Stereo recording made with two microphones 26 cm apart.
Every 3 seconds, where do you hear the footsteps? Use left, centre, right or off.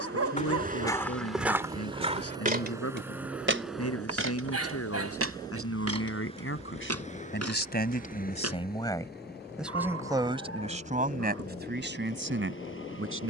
centre, right, right, off, off.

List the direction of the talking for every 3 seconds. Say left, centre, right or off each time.
left, left, left, right, right.